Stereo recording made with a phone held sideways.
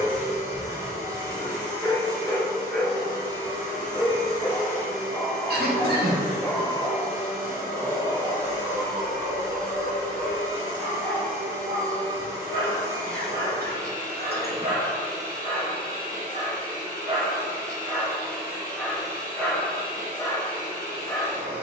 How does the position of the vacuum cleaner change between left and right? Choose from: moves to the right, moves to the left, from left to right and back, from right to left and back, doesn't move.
doesn't move.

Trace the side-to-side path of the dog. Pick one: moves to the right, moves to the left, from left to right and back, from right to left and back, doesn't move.
from left to right and back.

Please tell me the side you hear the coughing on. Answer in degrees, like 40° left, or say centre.
80° right.